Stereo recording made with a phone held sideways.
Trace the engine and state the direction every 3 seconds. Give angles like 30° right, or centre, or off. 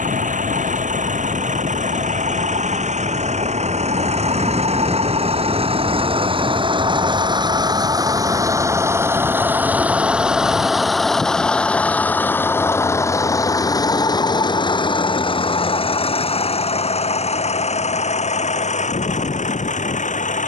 60° right, 50° right, 30° right, centre, 20° left, 40° left, 50° left.